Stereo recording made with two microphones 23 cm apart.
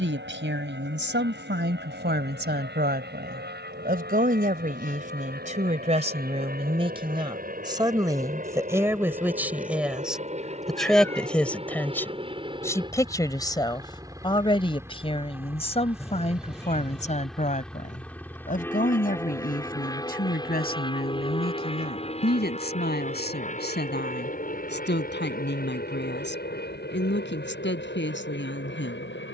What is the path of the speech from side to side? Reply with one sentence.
In this clip you hear the speech move from right to left.